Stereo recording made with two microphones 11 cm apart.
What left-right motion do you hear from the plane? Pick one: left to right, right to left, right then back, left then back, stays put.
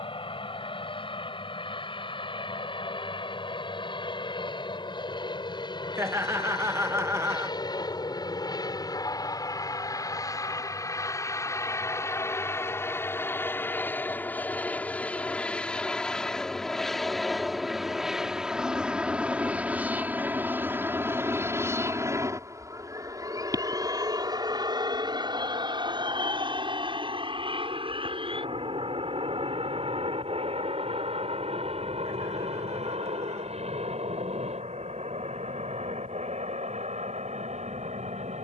left to right.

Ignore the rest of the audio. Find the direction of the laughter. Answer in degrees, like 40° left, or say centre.
20° right.